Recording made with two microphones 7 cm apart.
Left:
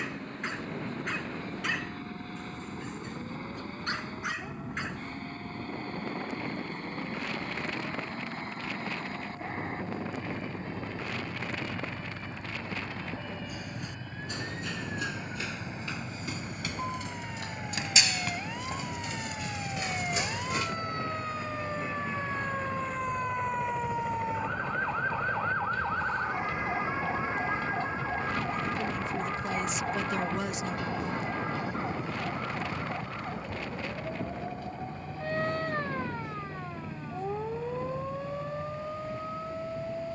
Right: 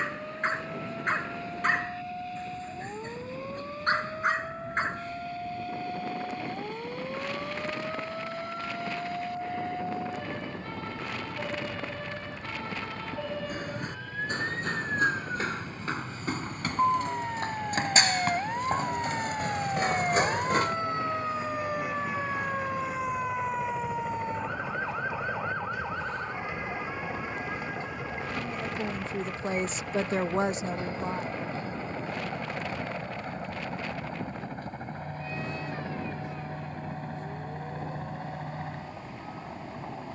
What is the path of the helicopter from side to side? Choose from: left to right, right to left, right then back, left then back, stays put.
left to right.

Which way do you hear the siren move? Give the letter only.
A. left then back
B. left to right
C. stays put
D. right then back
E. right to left
E.